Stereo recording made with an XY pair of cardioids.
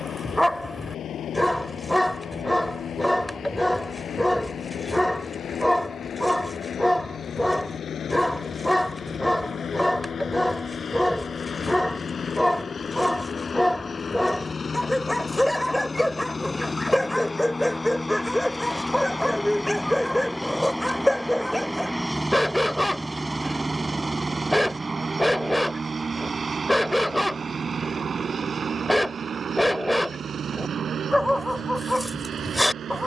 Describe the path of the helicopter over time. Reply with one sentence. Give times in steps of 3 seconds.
In this clip you hear the helicopter on the left from 0 s, in the centre from 18 s and on the right from 24 s.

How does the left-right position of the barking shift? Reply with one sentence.
You can hear the barking stay in one place.